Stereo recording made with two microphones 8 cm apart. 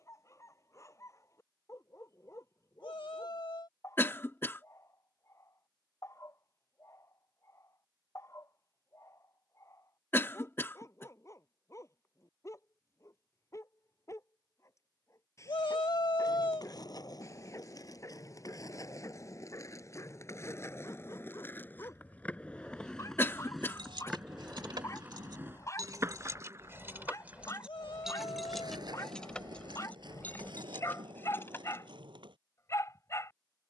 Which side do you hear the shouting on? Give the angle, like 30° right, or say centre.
80° left.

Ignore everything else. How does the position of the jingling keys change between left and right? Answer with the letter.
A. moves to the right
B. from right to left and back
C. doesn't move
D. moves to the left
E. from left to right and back
D.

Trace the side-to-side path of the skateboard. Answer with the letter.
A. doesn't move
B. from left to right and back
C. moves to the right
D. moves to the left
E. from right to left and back
C.